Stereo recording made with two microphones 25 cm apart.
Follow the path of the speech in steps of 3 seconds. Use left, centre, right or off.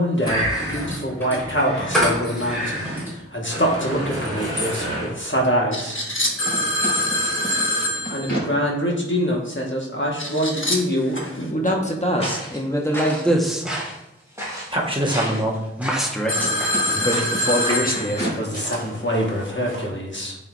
left, left, left, left, centre, centre, left.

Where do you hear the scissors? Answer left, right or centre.
left.